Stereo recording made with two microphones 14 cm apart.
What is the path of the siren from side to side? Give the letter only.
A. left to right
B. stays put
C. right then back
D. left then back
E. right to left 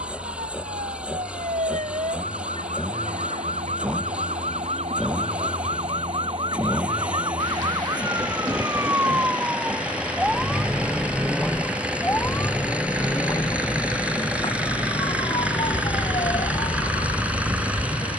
E.